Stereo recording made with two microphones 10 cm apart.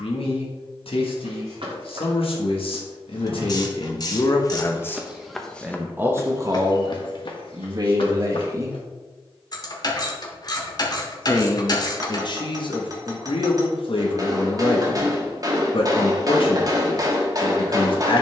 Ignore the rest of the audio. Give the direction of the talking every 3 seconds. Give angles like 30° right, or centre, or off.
70° left, 40° left, 40° right, 30° left, 60° left, 60° left.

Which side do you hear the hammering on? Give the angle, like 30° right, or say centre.
40° right.